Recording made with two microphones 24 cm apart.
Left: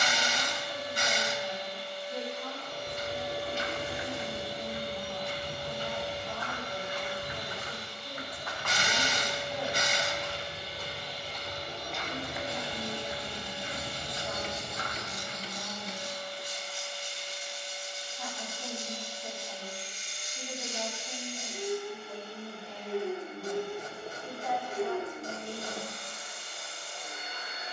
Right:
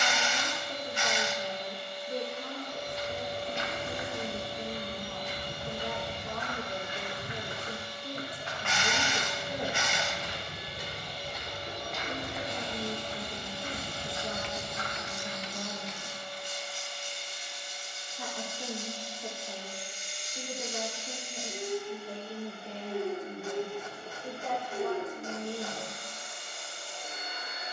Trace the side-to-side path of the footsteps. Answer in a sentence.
In this clip you hear the footsteps go right and come back.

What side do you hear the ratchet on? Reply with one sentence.
You can hear the ratchet on the left.